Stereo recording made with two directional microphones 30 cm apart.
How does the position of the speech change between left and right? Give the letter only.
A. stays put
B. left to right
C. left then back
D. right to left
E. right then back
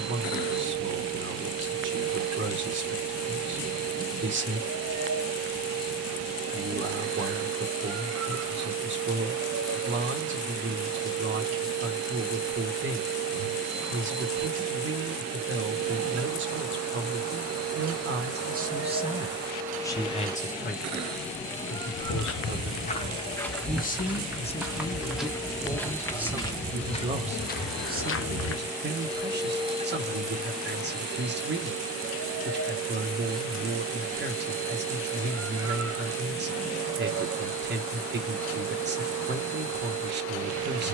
C.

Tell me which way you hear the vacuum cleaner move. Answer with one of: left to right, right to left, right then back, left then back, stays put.
left then back.